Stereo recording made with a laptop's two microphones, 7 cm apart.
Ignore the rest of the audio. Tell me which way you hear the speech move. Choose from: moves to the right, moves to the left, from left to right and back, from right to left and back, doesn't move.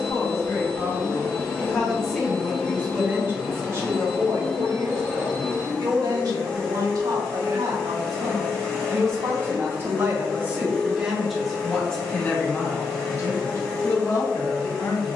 from left to right and back.